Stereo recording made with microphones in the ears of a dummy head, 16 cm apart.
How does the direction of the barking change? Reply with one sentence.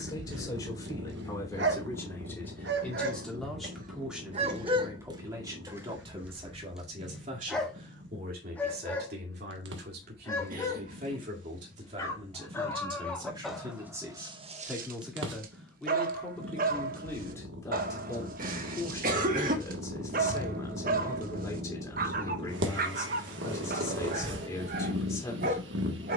You can hear the barking go left and come back.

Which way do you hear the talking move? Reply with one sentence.
You can hear the talking move from left to right and back again.